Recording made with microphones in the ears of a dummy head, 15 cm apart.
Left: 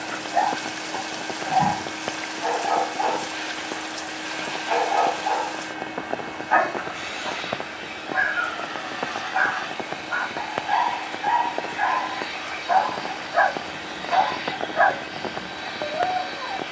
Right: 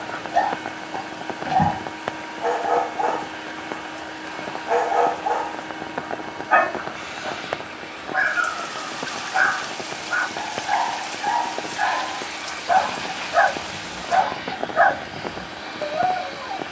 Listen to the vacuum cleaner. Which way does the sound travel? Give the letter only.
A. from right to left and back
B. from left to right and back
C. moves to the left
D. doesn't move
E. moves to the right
D.